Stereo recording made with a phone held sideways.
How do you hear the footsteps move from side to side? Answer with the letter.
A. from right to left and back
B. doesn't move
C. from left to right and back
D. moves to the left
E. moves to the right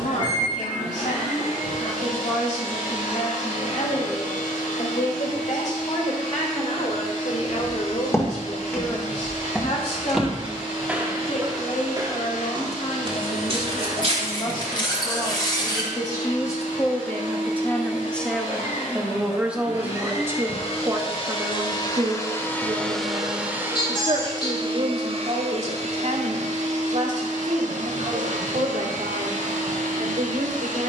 E.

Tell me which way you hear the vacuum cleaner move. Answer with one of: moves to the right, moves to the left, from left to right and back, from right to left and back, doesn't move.
moves to the right.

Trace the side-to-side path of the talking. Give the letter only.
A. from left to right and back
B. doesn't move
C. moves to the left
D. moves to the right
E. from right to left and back
D.